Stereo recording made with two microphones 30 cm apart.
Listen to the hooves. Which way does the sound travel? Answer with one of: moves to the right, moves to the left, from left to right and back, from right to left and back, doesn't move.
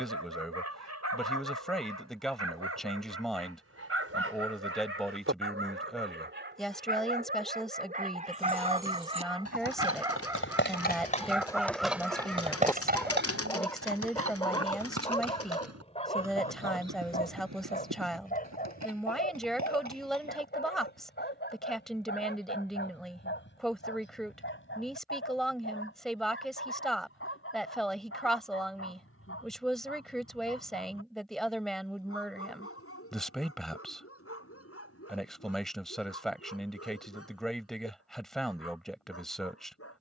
moves to the right.